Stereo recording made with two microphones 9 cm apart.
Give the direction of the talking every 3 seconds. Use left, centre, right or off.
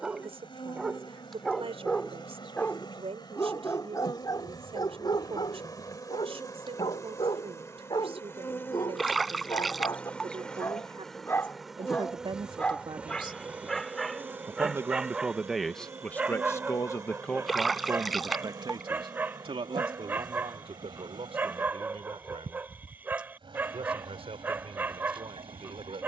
right, right, right, right, right, centre, right, right, right.